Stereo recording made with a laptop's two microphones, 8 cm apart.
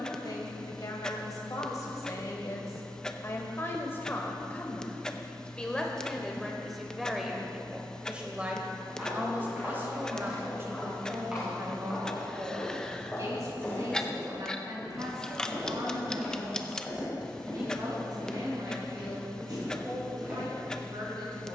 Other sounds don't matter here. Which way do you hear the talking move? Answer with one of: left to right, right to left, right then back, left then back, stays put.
left to right.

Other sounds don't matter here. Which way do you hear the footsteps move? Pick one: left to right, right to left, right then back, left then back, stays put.
left then back.